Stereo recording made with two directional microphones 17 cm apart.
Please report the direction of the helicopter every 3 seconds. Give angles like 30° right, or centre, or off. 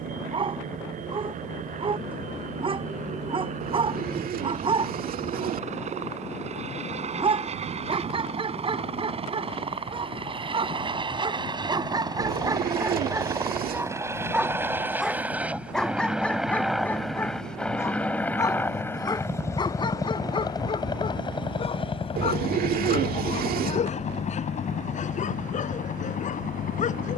50° right, 50° right, 40° right, 30° right, 20° right, centre, 20° left, 30° left, 50° left.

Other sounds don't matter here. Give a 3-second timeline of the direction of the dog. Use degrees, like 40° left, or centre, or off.
30° right, 30° right, 30° right, 30° right, 20° right, 10° left, 30° left, 40° left, 50° left.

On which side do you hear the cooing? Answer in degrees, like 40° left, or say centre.
60° right.